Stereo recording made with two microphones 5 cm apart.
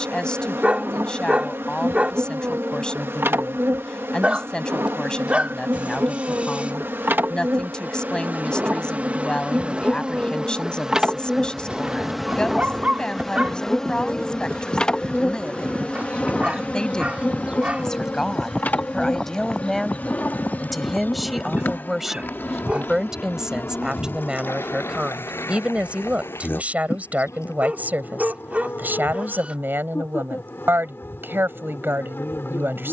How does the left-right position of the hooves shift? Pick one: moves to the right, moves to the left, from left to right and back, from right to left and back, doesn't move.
moves to the left.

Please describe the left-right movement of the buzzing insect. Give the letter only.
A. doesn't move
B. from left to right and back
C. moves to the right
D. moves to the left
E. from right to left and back
D.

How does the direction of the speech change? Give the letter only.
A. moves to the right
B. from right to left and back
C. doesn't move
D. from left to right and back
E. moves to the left
A.